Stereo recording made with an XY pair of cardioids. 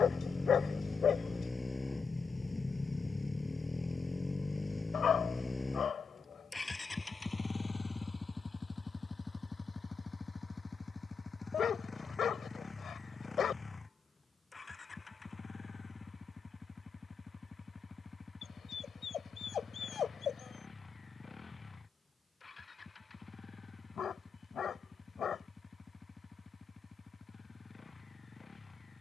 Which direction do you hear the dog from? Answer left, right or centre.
left.